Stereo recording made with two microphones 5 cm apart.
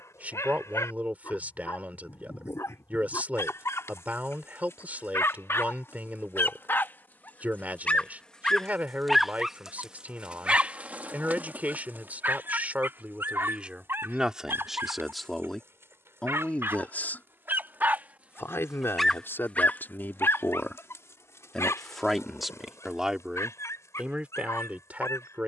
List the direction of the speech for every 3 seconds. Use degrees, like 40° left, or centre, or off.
30° right, 30° right, 30° right, 30° right, 20° right, 20° left, 50° left, centre, 30° right.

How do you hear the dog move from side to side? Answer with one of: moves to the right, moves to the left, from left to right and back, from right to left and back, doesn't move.
from left to right and back.